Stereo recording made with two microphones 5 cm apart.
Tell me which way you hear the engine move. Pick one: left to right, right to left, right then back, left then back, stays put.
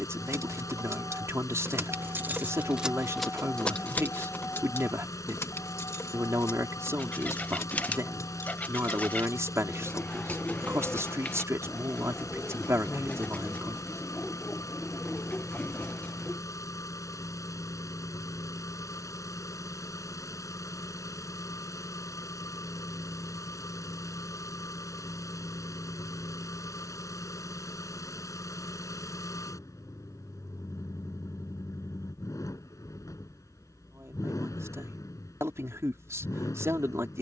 stays put.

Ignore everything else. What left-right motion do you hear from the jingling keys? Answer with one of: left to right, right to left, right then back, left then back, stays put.
right to left.